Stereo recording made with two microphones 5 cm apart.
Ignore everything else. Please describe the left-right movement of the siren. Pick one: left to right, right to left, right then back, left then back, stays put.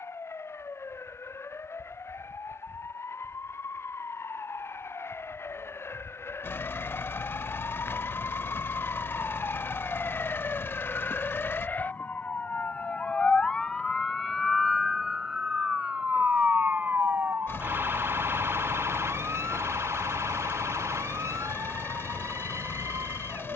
left to right.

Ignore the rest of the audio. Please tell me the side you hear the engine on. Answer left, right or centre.
left.